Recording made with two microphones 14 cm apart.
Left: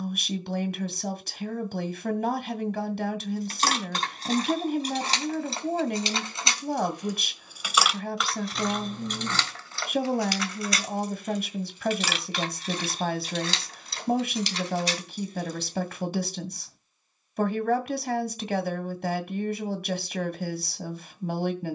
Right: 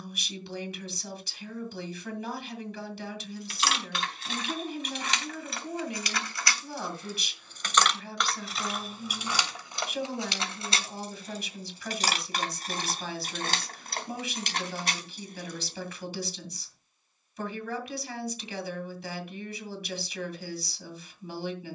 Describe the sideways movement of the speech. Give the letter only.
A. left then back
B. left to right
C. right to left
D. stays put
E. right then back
D.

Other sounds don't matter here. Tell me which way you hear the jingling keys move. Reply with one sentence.
In this clip you hear the jingling keys move to the right.